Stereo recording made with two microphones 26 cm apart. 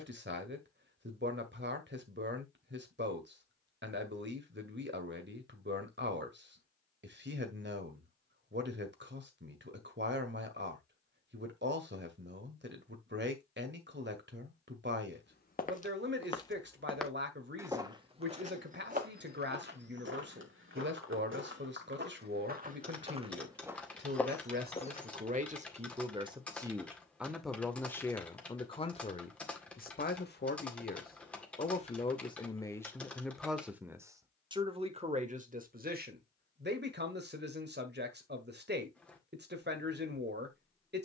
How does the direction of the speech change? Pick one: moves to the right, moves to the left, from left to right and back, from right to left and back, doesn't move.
from right to left and back.